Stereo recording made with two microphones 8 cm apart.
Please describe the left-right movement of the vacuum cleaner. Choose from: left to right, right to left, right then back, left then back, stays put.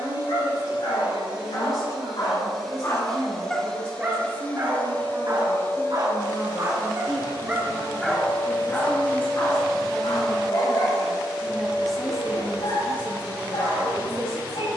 left then back.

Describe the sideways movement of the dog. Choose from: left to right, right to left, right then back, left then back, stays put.
right then back.